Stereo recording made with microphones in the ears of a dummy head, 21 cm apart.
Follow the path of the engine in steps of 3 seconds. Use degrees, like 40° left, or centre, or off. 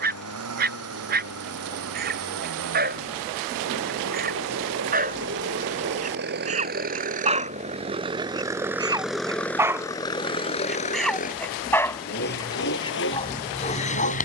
70° right, 60° right, 30° right, 20° left, 50° left.